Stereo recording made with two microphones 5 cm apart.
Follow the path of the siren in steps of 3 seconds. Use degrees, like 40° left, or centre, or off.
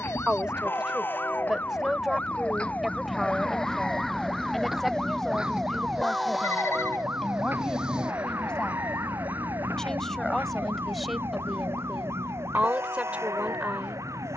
30° left, centre, 40° right, 60° right, 60° right.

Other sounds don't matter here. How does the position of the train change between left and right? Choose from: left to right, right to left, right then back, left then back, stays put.
left to right.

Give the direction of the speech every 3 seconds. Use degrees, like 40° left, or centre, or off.
10° right, centre, 10° left, centre, 20° right.